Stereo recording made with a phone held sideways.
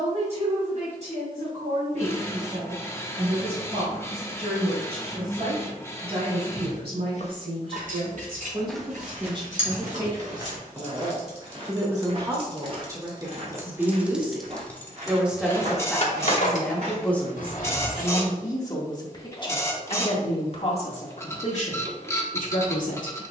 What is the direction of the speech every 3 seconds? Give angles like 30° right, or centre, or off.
50° right, 50° right, 40° right, 30° right, 20° right, centre, 30° left, 50° left.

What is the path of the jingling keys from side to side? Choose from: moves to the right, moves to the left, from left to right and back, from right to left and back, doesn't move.
moves to the left.